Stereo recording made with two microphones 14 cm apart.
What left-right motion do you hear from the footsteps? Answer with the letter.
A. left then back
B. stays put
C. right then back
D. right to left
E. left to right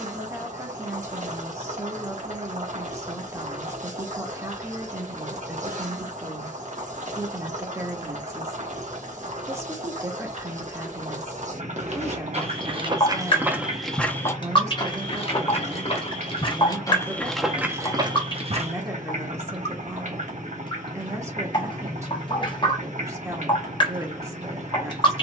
A.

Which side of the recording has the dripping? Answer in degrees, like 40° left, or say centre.
40° left.